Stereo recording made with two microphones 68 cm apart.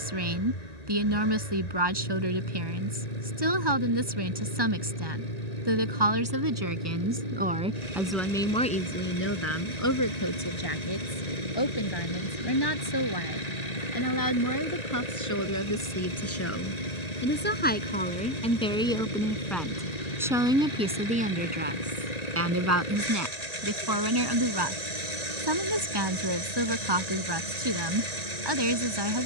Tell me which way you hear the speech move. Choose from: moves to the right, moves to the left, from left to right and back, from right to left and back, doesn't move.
from right to left and back.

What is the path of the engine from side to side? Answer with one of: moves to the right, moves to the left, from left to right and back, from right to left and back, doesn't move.
doesn't move.